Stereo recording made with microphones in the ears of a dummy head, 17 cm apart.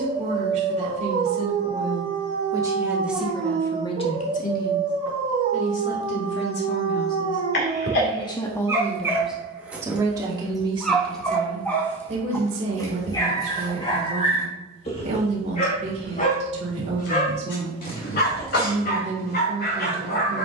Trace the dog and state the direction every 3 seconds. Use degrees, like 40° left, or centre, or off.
40° right, 40° right, 30° right, centre, 30° left, 40° left, 60° left.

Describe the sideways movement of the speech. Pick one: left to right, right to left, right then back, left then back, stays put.
left then back.